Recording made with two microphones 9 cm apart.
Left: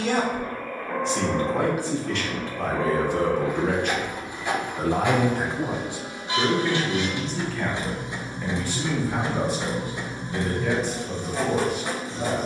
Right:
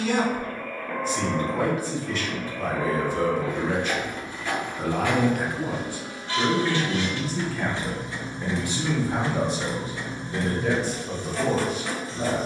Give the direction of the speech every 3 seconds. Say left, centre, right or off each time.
left, left, centre, right.